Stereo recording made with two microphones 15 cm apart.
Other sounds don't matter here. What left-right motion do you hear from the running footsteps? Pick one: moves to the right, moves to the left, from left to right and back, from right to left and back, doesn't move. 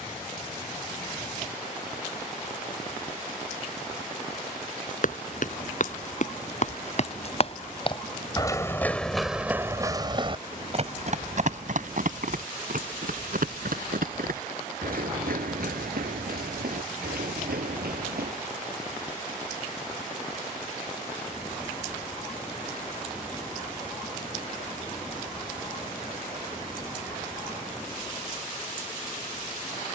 moves to the right.